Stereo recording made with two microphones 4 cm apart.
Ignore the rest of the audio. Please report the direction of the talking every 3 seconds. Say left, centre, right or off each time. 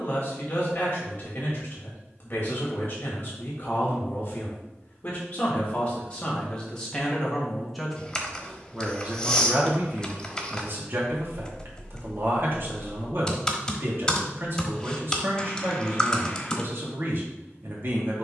left, left, centre, right, right, right.